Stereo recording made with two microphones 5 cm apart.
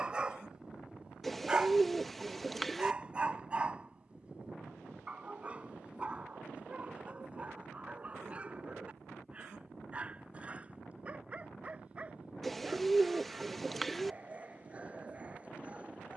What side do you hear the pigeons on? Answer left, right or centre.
centre.